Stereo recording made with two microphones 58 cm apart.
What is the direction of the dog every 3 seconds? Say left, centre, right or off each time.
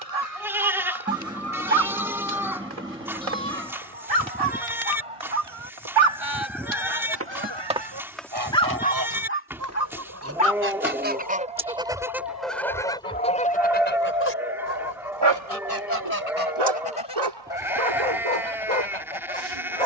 right, right, centre, left, centre, right, right.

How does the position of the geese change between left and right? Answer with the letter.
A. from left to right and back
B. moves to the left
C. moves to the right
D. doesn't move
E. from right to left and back
B.